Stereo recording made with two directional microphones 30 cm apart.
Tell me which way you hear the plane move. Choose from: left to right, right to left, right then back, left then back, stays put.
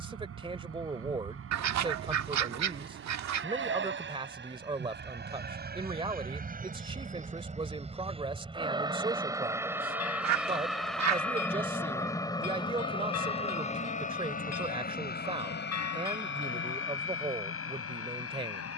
right to left.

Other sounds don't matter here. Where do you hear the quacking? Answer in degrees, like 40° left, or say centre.
60° right.